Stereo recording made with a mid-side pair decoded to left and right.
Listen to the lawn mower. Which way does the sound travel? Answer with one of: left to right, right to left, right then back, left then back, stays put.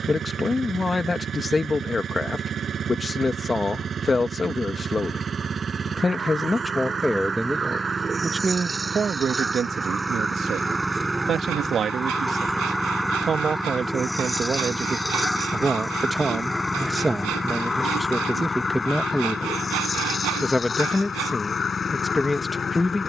right to left.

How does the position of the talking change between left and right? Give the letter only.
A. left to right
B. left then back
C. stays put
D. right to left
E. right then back
E.